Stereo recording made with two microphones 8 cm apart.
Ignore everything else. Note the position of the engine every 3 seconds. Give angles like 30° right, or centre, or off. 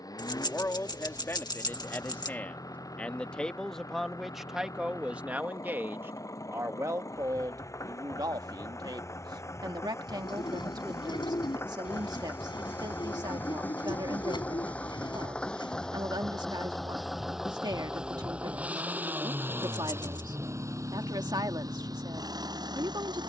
50° left, 40° left, 40° left, 30° left, 20° left, centre, 30° right, 50° right.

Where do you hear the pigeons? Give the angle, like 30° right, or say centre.
70° left.